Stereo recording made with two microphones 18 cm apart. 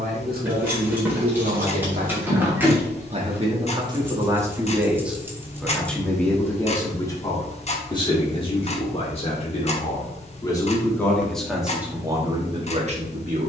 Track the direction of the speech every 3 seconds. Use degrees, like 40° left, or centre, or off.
50° right, 20° right, 20° left, 20° left, 30° right.